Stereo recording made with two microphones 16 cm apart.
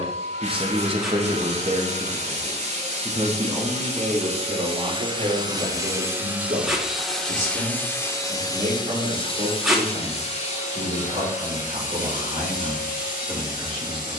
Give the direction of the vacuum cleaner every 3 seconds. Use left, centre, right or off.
right, right, centre, left, left.